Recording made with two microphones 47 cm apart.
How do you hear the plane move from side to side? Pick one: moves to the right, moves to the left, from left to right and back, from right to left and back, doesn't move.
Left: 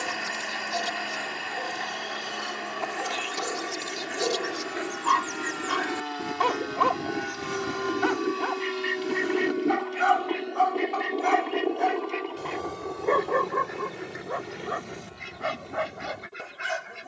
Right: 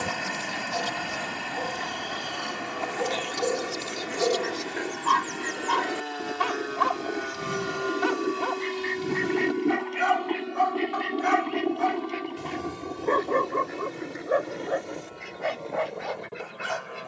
moves to the right.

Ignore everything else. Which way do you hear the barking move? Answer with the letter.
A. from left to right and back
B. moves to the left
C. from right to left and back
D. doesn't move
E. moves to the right
A.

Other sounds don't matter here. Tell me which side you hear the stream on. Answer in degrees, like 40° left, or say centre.
70° right.